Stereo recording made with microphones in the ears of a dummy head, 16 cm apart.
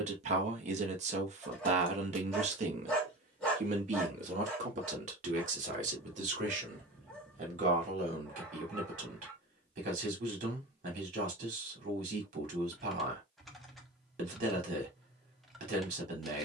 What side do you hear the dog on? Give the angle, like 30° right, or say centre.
centre.